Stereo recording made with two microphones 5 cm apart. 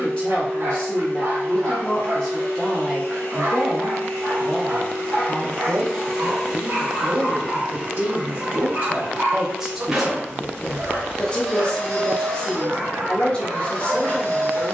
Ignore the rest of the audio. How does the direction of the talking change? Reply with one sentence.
You can hear the talking move from left to right and back again.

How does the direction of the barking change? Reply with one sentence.
You can hear the barking stay put.